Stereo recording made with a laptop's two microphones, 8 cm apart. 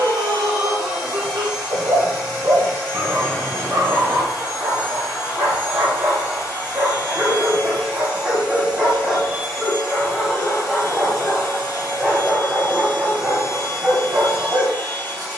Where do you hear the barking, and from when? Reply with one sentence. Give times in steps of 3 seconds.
You can hear the barking on the right from 0 s, in the centre from 9 s and on the right from 12 s.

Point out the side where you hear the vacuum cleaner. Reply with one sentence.
You can hear the vacuum cleaner on the left.